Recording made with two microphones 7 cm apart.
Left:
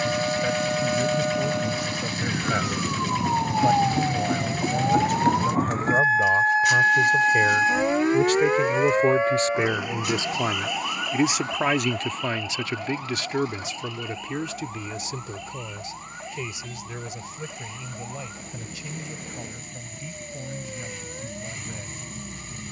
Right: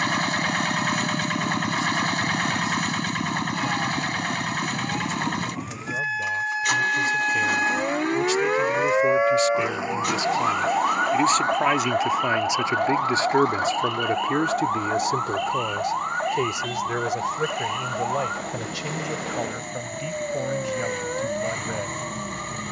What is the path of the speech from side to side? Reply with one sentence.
You can hear the speech move to the right.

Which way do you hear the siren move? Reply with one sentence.
You can hear the siren travel towards the right.